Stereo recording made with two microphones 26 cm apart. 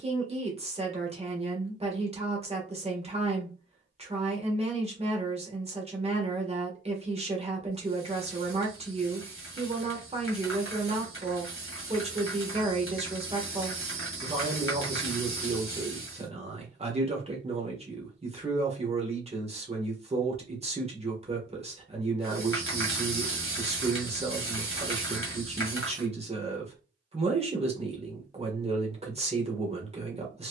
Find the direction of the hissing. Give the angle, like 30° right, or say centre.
50° left.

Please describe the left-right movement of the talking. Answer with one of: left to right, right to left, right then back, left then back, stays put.
stays put.